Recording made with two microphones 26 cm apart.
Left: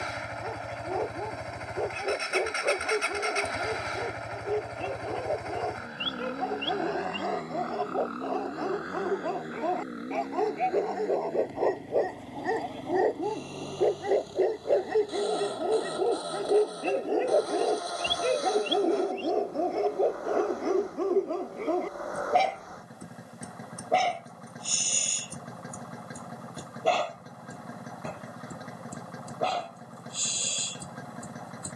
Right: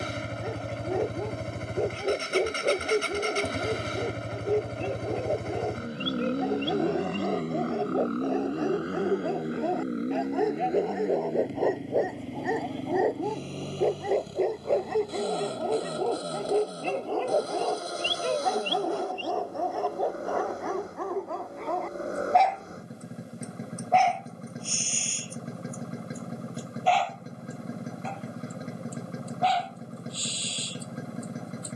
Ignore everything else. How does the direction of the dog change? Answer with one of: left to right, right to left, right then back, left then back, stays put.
right to left.